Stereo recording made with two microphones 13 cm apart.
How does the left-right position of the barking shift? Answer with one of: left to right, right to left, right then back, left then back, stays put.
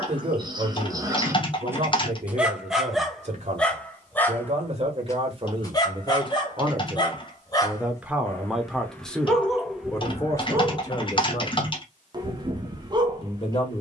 left then back.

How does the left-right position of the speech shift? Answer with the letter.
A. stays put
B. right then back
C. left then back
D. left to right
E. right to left
E.